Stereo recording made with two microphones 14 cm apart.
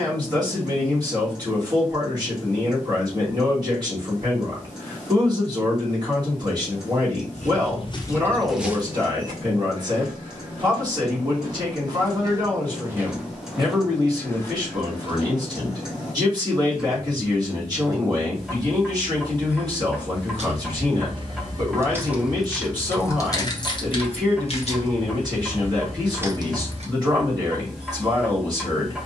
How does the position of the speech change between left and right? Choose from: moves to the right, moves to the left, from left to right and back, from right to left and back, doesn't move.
doesn't move.